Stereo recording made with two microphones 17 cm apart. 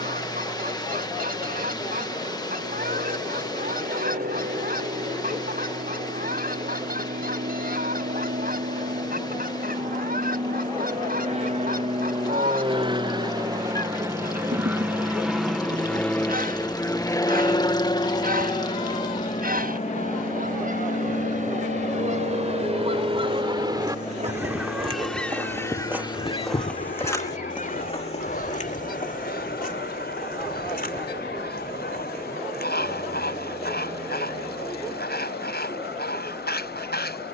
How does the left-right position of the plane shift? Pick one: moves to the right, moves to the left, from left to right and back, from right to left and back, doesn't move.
moves to the left.